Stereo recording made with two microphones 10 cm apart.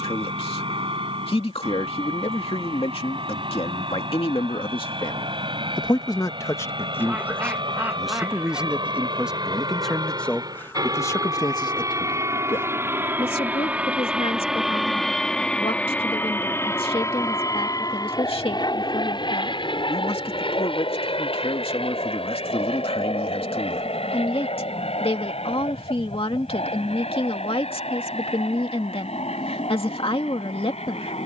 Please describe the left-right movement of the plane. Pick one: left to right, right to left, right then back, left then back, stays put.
right to left.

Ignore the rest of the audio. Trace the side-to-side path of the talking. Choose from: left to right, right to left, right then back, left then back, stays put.
right then back.